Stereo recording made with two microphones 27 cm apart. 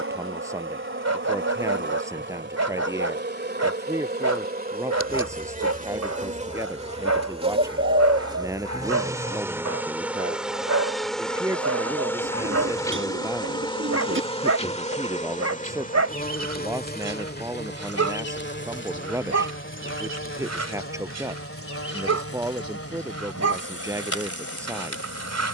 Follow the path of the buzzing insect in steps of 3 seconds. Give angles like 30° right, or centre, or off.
40° right, 30° right, 20° right, centre, 20° left, 30° left, 50° left, 50° left, 60° left.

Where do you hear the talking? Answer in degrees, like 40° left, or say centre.
10° right.